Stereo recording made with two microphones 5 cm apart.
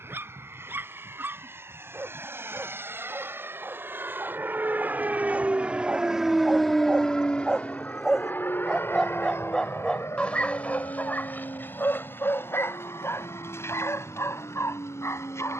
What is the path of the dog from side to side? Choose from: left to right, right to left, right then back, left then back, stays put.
right to left.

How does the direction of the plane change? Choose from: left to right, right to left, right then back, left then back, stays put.
right to left.